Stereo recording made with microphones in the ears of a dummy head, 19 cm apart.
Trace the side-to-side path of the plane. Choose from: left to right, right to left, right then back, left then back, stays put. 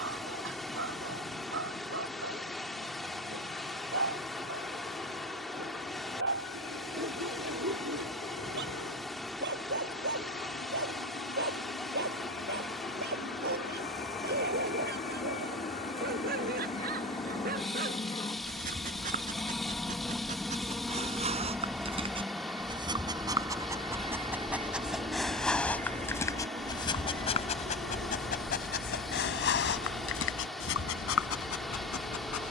left to right.